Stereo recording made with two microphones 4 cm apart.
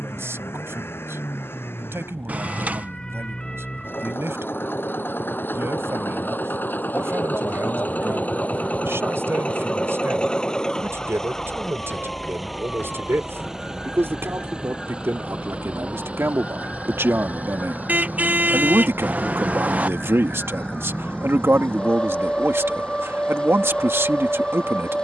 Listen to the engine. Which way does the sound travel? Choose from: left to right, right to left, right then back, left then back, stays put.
left to right.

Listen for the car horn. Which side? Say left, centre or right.
right.